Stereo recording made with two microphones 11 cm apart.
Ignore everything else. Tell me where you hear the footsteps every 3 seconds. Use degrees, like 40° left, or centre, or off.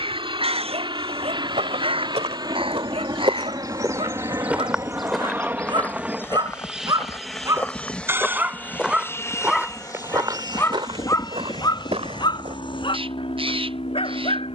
70° right, 10° right, 20° left, 40° right, 70° right.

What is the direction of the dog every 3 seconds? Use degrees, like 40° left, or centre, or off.
60° right, 50° right, 20° right, 20° left, 50° left.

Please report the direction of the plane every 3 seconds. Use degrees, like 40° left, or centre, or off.
50° right, 30° right, centre, 30° left, 50° left.